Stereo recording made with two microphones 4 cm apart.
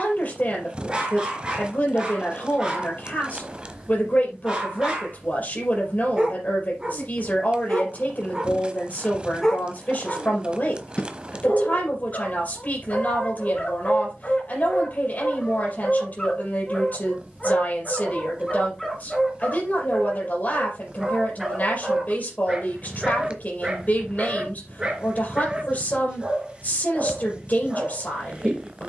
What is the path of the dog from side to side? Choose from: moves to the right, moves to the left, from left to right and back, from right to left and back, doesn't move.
from right to left and back.